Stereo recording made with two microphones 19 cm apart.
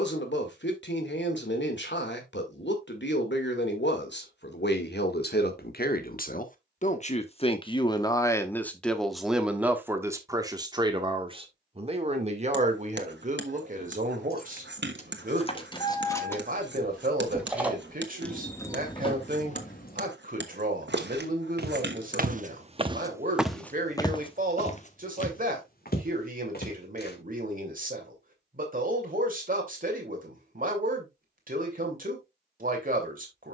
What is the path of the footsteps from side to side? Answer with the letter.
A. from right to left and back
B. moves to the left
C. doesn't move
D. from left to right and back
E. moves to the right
B.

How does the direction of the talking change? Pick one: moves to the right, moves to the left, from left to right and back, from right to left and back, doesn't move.
moves to the right.